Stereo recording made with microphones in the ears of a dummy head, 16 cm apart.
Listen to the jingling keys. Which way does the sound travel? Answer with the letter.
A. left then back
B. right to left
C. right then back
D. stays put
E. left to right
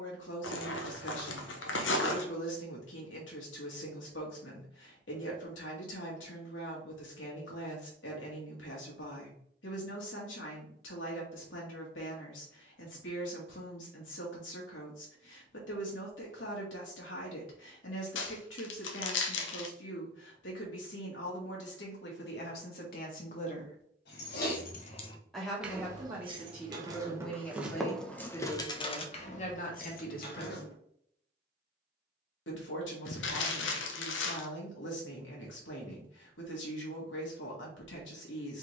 C.